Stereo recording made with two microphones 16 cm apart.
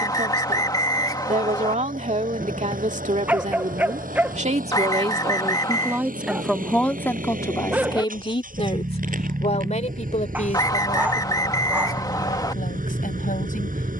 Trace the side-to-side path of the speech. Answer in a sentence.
You can hear the speech go from the right side to the left.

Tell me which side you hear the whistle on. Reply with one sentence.
In this clip you hear the whistle on the left.